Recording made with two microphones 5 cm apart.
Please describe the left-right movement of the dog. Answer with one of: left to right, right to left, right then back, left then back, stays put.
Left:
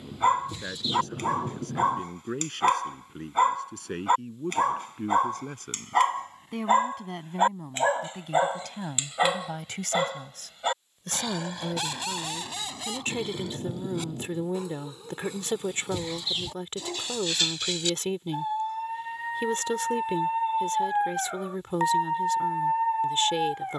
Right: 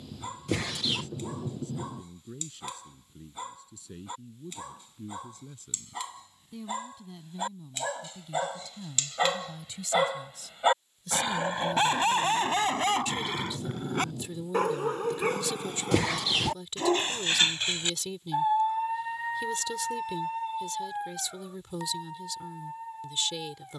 right then back.